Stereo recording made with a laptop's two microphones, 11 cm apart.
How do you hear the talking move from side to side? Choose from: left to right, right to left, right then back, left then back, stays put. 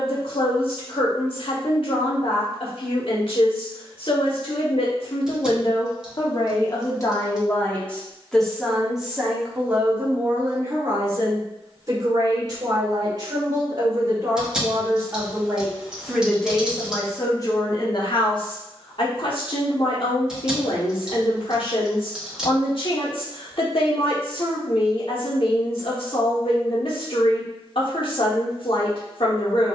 right then back.